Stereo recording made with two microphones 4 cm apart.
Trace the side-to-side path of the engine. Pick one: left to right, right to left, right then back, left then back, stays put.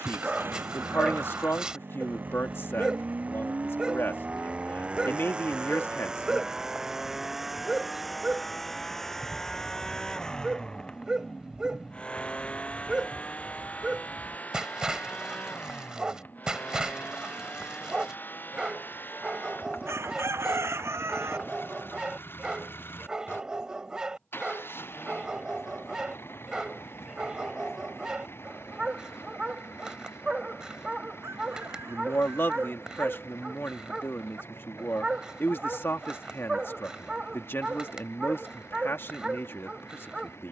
right to left.